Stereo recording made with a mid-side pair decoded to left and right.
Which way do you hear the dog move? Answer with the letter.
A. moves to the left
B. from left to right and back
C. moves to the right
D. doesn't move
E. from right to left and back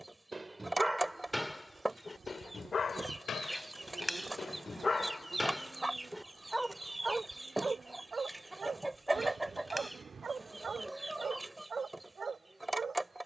E.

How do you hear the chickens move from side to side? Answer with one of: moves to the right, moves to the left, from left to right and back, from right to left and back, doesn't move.
doesn't move.